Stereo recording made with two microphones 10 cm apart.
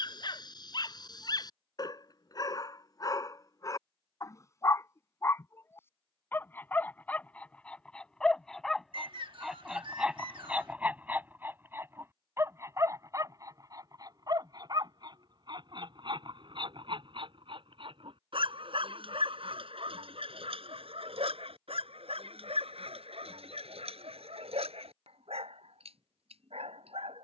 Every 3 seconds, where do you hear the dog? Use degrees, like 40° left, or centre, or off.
40° left, 30° left, 10° left, 10° right, 30° right, 50° right, 60° right, 70° right, 80° right.